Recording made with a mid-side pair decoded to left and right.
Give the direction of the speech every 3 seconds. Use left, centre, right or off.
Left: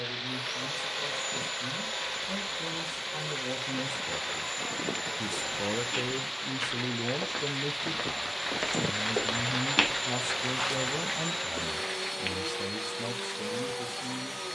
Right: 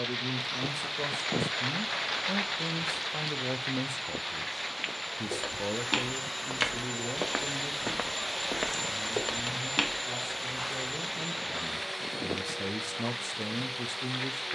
right, centre, left, left, right.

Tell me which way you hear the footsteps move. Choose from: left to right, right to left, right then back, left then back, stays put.
right to left.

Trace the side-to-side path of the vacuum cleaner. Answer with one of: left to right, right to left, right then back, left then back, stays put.
right then back.